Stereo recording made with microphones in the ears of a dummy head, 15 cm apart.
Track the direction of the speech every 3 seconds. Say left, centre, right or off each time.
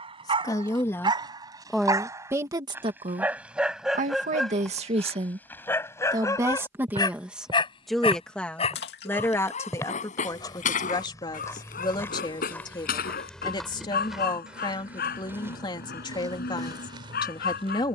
centre, right, centre, left, left, left.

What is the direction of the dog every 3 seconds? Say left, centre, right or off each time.
right, centre, left, left, left, left.